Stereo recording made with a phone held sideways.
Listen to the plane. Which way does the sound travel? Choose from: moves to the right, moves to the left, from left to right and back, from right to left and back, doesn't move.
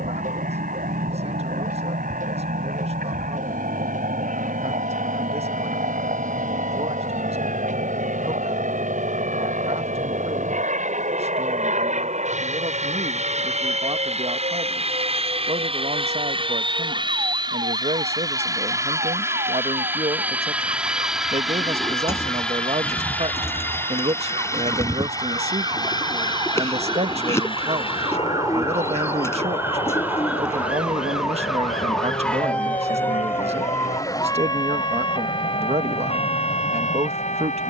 moves to the left.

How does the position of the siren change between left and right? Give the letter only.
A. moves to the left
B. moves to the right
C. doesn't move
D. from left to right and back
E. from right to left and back
A.